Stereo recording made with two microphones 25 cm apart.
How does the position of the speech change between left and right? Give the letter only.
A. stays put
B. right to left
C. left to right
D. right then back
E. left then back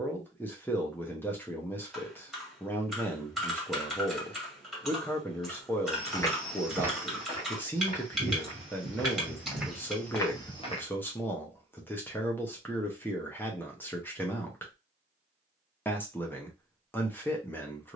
A.